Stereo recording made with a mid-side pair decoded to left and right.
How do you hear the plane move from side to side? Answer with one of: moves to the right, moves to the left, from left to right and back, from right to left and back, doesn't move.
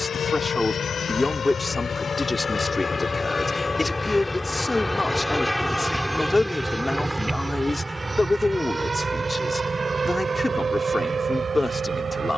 moves to the right.